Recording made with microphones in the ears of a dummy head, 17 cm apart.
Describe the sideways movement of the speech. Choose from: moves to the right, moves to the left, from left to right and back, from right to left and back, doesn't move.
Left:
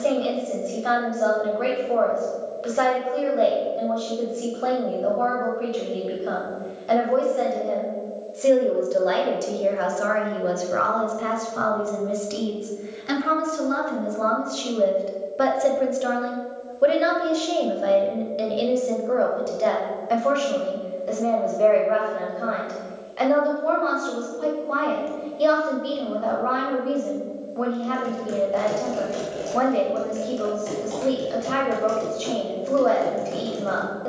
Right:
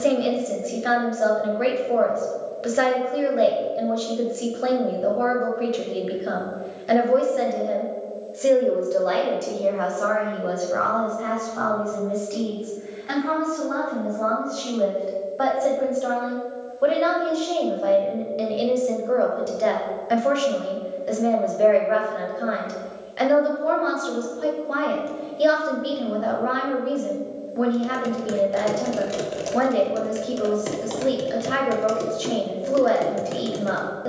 from right to left and back.